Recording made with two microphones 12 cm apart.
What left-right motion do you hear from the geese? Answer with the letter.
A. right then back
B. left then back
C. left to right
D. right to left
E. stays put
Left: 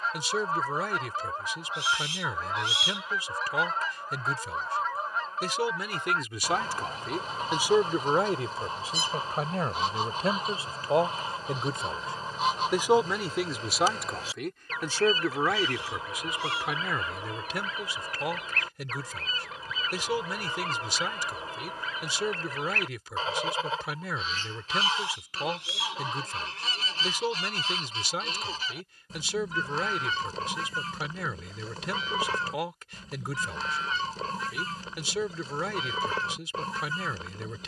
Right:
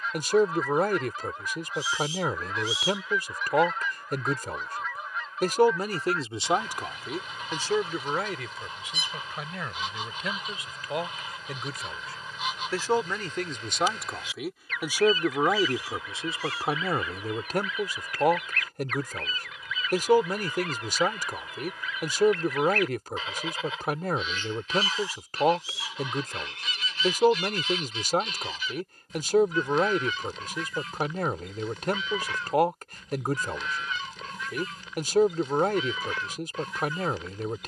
E.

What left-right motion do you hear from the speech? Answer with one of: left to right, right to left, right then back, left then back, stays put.
left then back.